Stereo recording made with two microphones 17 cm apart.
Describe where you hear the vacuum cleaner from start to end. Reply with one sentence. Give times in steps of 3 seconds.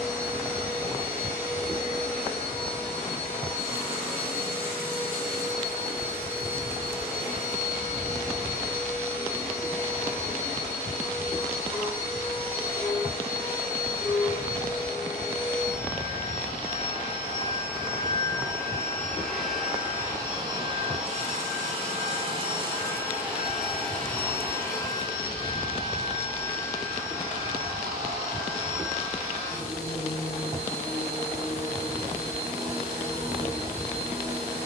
You can hear the vacuum cleaner on the left from 0 s, in the centre from 18 s, on the right from 21 s and on the left from 24 s.